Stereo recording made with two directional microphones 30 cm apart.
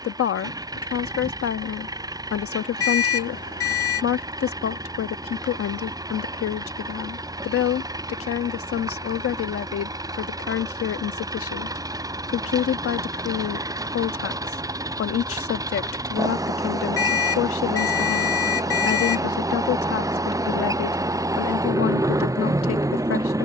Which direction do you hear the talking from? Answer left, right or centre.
left.